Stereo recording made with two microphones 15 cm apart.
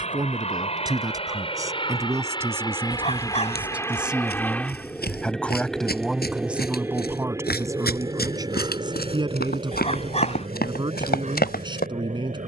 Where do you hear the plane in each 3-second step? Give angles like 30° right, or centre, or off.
40° left, 10° left, 20° right, 40° right.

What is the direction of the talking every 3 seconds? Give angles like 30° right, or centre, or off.
20° right, centre, 20° right, 30° right.